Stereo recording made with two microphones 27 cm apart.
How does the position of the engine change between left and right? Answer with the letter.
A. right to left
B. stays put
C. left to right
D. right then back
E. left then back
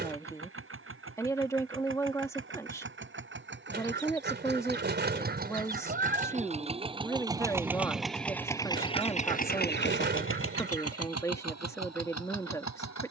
A.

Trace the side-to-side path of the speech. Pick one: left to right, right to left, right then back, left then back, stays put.
stays put.